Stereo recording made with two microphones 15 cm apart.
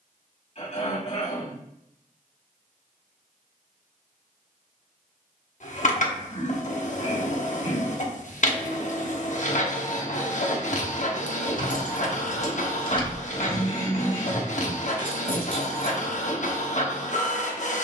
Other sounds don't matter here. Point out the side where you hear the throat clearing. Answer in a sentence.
You can hear the throat clearing on the left.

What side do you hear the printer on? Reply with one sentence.
In this clip you hear the printer on the left.